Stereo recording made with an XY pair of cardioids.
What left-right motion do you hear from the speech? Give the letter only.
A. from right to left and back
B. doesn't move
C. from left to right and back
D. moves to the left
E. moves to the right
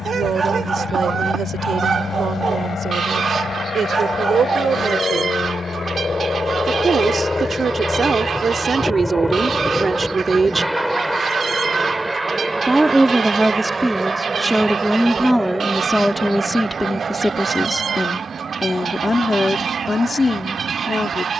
D.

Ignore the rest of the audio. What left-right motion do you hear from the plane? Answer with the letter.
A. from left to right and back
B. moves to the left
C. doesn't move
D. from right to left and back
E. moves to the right
E.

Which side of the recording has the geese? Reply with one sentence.
In this clip you hear the geese on the right.